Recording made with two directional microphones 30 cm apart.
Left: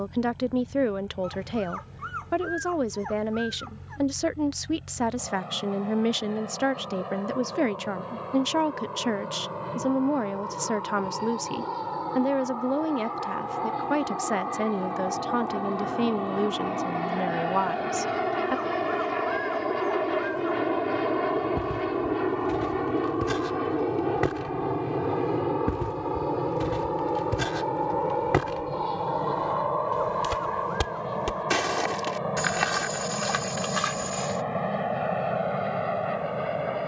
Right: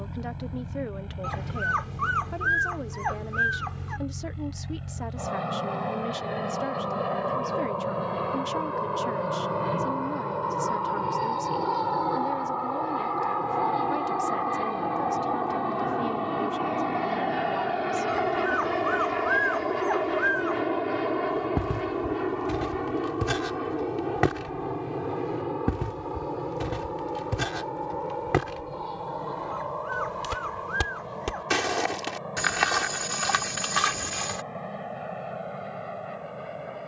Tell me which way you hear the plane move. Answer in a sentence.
You can hear the plane travel towards the left.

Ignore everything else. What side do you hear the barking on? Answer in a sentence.
You can hear the barking on the right.